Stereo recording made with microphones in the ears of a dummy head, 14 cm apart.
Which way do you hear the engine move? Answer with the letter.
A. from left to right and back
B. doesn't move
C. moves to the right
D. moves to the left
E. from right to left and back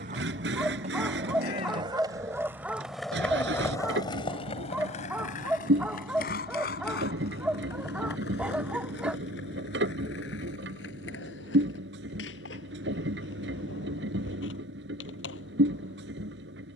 B.